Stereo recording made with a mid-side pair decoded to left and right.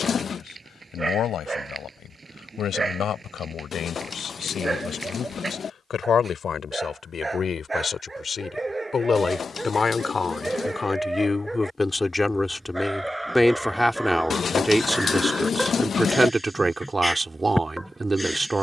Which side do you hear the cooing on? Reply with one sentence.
You can hear the cooing on the left.